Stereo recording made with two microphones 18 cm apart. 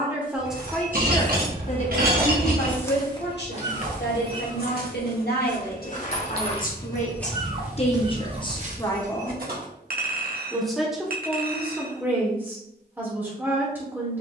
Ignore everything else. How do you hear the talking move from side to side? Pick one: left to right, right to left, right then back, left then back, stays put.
left then back.